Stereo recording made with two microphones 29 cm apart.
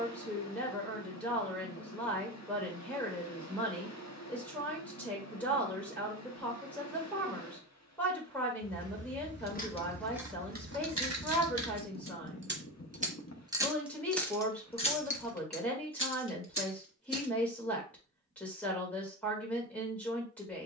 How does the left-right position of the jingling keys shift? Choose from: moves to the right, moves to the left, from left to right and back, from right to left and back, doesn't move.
from left to right and back.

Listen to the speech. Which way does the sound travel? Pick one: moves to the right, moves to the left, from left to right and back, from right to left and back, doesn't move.
doesn't move.